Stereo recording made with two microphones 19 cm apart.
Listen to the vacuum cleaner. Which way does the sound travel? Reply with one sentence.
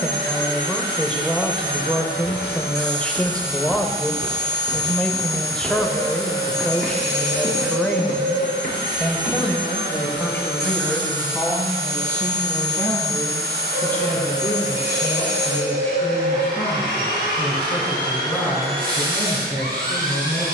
You can hear the vacuum cleaner stay put.